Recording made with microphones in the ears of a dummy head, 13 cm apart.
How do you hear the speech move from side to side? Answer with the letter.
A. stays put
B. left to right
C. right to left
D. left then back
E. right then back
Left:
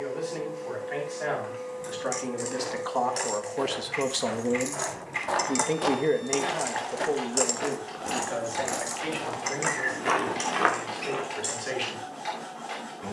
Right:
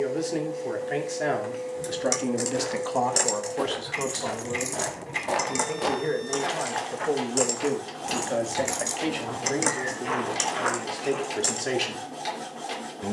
D.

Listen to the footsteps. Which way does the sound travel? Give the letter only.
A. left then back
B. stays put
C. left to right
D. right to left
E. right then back
D.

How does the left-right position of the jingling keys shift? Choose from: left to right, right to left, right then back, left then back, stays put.
left then back.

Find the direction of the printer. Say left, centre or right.
right.